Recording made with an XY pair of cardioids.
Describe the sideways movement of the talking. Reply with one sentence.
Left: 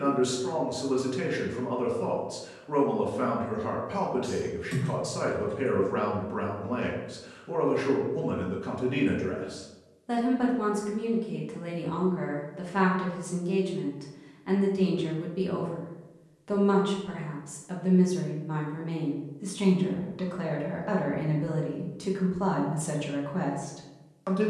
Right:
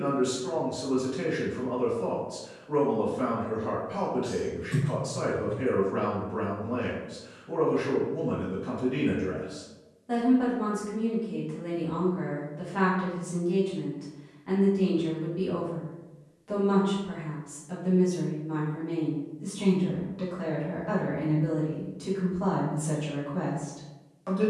In this clip you hear the talking stay in one place.